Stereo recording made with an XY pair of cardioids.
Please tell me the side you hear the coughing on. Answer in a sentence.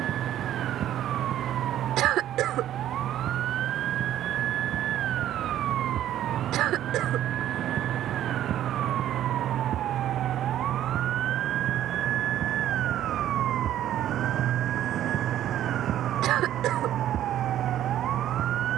In this clip you hear the coughing on the right.